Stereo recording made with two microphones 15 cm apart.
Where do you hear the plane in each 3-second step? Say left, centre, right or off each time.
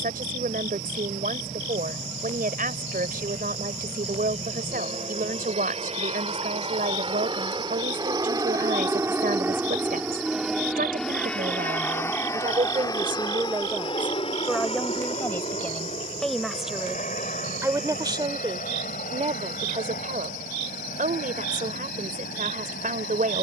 right, right, right, centre, left, left, left, left.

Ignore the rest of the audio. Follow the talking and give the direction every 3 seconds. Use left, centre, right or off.
right, right, right, right, right, centre, right, right.